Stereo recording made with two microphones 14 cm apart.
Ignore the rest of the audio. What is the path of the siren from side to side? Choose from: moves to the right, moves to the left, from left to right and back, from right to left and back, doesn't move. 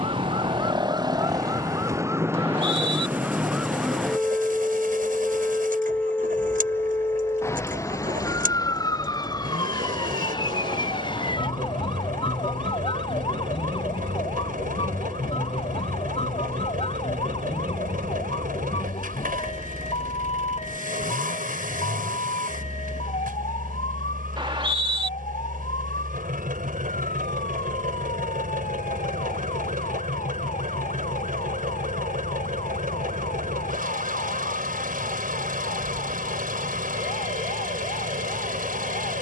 moves to the left.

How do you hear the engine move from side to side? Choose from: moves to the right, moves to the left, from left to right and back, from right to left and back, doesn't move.
doesn't move.